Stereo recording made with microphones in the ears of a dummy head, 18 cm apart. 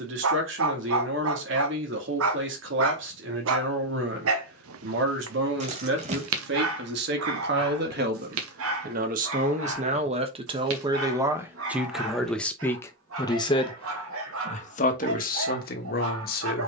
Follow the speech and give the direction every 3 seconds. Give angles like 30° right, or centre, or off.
70° right, 70° right, 60° right, 30° right, 20° left, 50° left.